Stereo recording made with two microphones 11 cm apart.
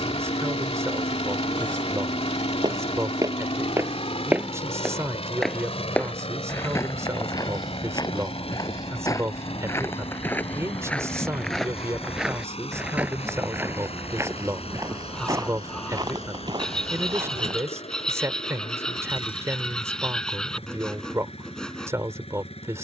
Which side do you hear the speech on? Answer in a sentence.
You can hear the speech on the right.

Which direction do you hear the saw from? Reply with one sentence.
In this clip you hear the saw in the centre.